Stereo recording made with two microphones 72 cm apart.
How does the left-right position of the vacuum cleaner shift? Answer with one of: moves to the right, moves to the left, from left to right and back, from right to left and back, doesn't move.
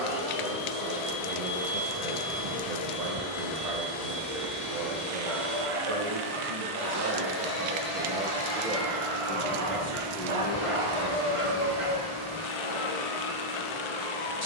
doesn't move.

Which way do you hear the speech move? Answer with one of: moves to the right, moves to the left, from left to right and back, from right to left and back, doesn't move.
moves to the left.